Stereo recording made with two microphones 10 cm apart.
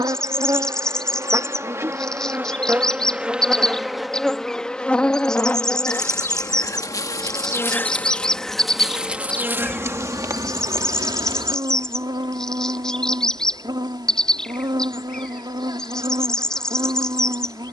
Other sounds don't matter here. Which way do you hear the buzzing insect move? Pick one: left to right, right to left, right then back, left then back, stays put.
left then back.